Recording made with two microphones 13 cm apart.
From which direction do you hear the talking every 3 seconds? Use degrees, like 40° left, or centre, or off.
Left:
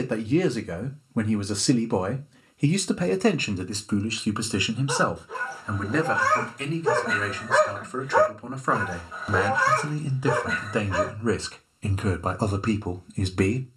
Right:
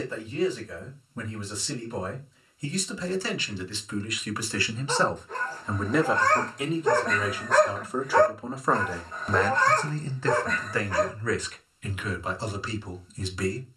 70° left, 30° left, 10° right, 20° left, 50° left.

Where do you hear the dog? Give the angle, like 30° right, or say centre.
10° left.